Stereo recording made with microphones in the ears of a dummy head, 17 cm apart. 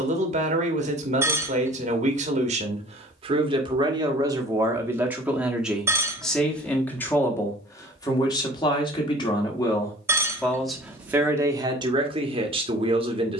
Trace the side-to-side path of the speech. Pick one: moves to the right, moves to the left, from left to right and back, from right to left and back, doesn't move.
from right to left and back.